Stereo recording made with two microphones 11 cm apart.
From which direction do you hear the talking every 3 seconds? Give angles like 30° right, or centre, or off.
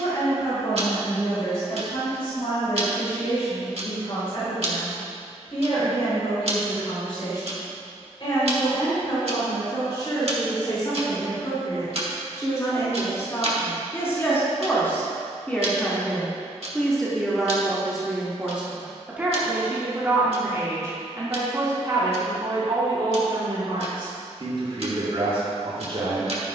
60° left, 50° left, 50° left, 40° left, 30° left, 10° left, 20° right, 40° right, 50° right.